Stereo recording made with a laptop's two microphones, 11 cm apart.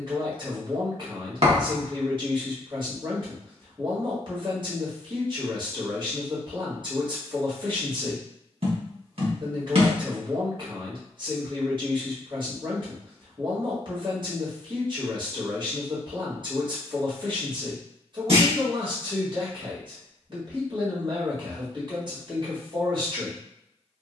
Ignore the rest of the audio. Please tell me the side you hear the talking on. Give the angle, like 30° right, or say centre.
50° right.